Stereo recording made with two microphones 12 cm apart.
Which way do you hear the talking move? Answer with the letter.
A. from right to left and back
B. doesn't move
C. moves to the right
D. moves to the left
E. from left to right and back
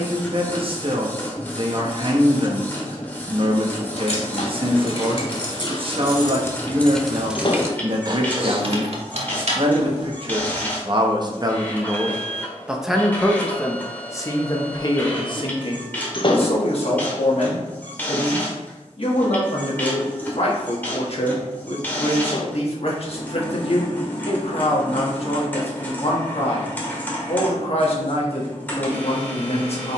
D.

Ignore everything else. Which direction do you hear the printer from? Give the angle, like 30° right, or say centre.
10° left.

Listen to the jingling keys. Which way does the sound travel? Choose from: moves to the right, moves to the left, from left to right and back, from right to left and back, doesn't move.
moves to the right.